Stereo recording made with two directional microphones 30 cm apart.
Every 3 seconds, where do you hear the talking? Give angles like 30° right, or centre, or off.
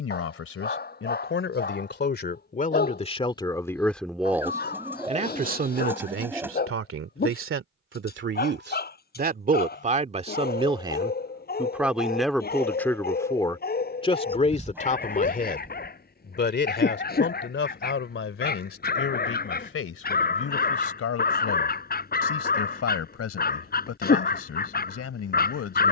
40° left, 10° right, 40° right, 20° right, 10° left, 40° left, 50° left, 50° left, 50° left.